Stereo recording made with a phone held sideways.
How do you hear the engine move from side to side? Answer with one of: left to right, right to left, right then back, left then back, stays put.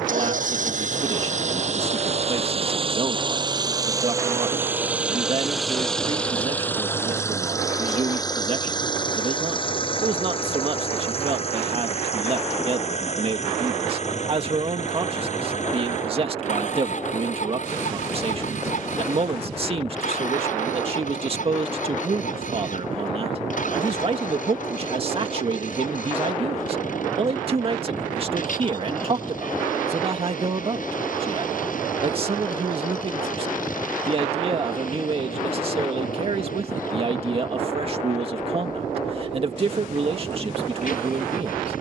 right to left.